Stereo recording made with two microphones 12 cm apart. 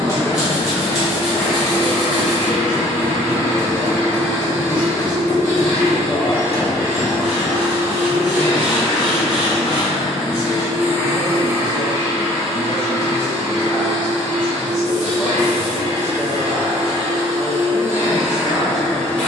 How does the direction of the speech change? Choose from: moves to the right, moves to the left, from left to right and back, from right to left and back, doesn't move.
from right to left and back.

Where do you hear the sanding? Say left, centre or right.
centre.